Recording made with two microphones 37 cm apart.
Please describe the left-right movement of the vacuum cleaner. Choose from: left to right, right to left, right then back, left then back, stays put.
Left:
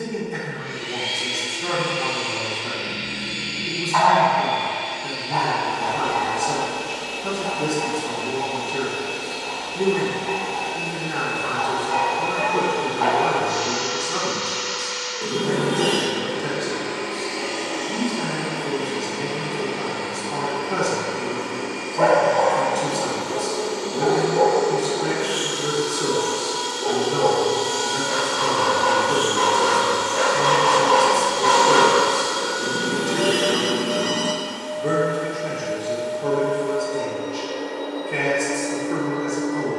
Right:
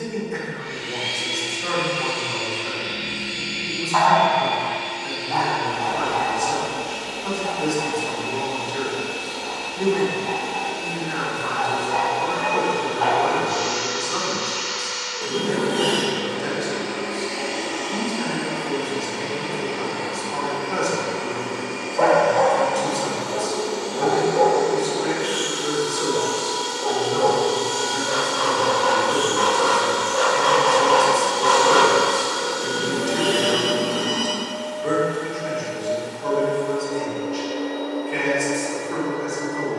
right to left.